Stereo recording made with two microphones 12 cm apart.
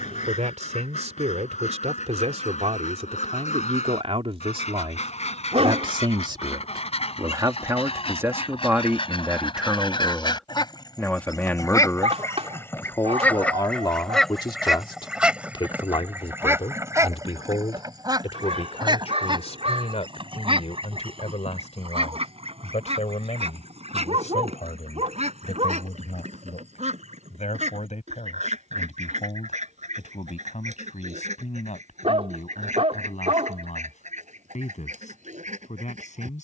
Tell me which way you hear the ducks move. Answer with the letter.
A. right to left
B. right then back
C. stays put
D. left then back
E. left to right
E.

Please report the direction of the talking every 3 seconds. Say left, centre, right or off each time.
right, right, right, centre, left, left, left, left, left, left, left, left.